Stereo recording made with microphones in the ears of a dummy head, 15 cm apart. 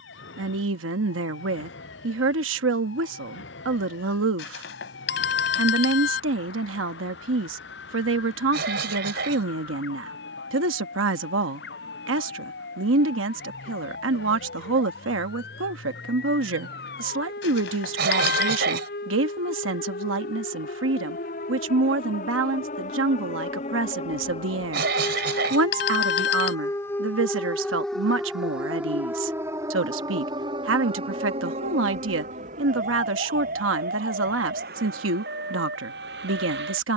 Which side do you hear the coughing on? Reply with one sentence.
You can hear the coughing on the right.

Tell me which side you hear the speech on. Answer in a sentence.
You can hear the speech on the right.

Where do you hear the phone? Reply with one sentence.
You can hear the phone on the left.